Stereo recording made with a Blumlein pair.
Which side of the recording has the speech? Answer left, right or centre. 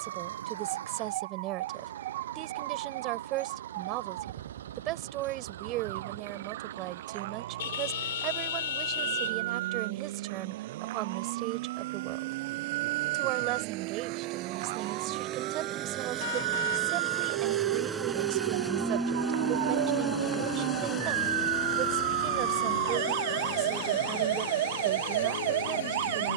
right.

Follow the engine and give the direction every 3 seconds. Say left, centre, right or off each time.
right, right, right, right, right, right, centre, left, left.